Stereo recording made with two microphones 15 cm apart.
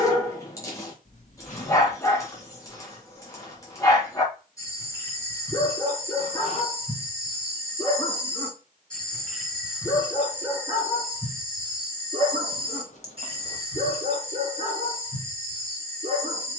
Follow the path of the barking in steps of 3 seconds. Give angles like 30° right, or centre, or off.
20° left, 20° left, 20° left, 10° right, 40° right, 40° right.